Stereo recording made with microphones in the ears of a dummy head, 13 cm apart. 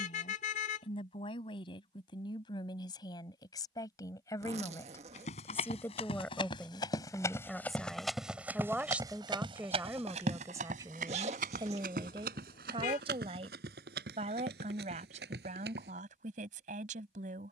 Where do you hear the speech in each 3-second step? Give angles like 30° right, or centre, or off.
30° left, 20° left, centre, 20° right, 40° right, 60° right.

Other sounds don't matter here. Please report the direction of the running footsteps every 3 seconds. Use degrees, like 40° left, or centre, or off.
off, 50° left, 10° left, 50° right, 70° right, 80° right.